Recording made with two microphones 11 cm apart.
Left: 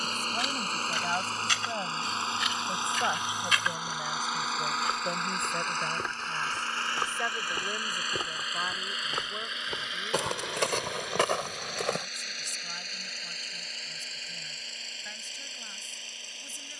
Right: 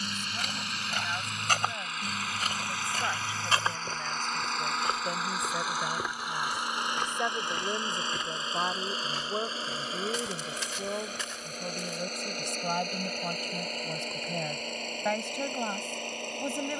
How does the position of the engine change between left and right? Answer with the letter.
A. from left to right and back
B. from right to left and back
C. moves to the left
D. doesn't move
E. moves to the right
E.